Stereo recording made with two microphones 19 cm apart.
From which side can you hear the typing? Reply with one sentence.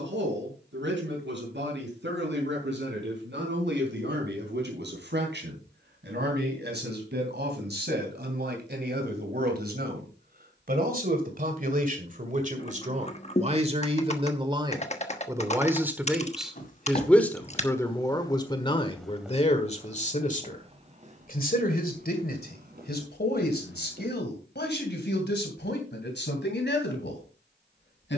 You can hear the typing on the left.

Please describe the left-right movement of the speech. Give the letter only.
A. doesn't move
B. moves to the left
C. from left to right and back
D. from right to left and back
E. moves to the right
B.